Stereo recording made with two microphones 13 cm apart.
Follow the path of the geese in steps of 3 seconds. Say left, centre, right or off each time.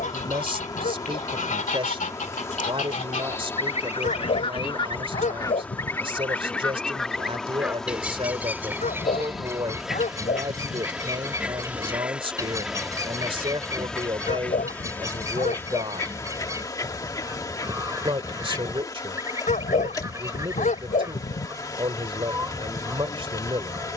left, left, centre, right, right, right, right, right.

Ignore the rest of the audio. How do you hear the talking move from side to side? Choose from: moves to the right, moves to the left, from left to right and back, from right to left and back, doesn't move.
doesn't move.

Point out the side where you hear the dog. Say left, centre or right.
left.